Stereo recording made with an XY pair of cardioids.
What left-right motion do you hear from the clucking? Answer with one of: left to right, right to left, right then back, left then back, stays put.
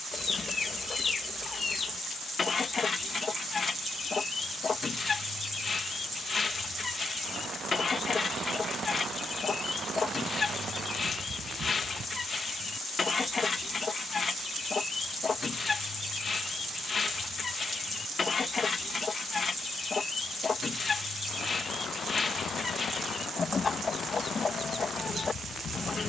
stays put.